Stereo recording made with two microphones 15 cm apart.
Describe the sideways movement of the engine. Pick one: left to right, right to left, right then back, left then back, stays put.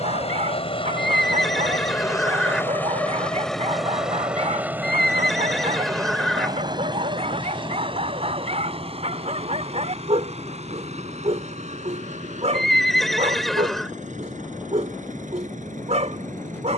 left to right.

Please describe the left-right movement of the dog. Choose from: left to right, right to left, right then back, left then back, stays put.
stays put.